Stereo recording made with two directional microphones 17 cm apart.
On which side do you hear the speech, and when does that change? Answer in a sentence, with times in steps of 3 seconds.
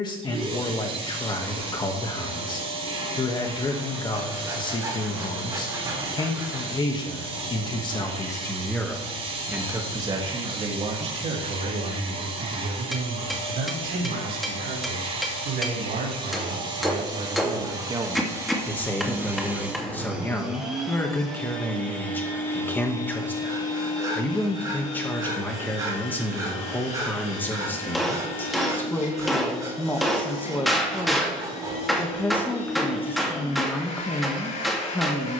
You can hear the speech on the left from 0 s, on the right from 9 s and in the centre from 18 s.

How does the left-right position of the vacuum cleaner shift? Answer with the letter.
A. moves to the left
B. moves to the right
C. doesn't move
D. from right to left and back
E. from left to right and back
A.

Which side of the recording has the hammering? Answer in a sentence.
You can hear the hammering in the centre.